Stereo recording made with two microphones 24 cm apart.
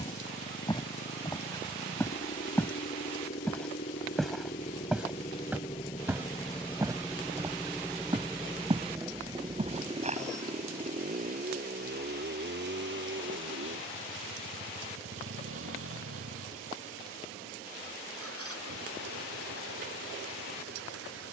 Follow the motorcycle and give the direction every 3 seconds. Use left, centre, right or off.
left, left, centre, right, right, right, right.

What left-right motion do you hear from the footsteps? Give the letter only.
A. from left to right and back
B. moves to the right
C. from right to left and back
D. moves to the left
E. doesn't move
B.